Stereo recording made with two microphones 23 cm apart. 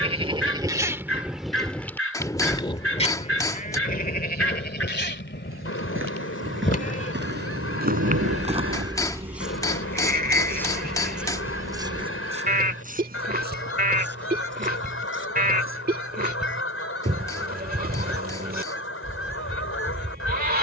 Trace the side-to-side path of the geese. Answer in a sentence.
You can hear the geese stay in one place.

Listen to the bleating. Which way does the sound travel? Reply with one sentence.
In this clip you hear the bleating go left and come back.